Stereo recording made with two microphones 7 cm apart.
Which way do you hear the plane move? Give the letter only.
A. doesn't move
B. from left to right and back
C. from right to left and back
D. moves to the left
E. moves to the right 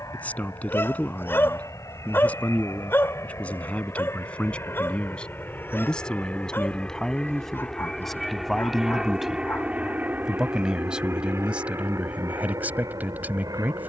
E.